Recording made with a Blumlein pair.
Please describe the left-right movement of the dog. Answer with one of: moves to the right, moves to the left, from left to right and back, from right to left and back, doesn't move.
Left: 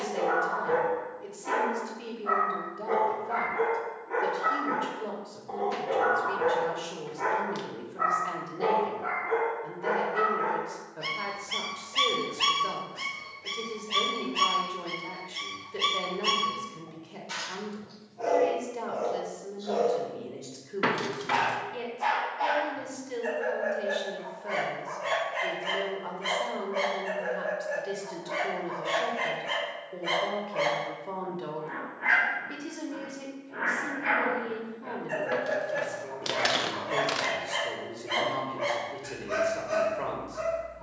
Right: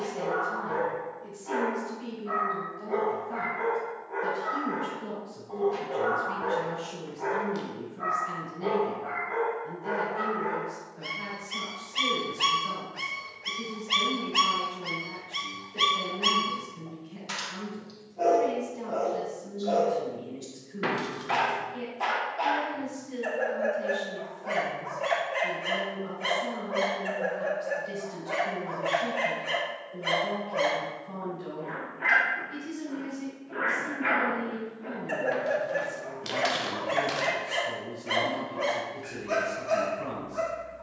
moves to the right.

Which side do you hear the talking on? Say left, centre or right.
left.